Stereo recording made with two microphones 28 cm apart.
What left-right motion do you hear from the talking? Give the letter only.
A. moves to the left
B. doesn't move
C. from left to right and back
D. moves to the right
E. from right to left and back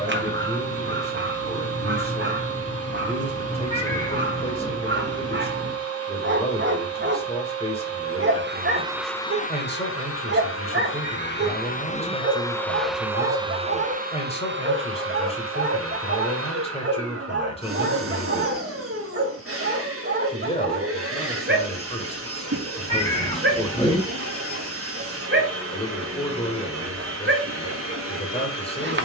B.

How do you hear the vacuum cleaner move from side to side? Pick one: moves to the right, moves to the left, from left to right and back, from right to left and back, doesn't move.
from right to left and back.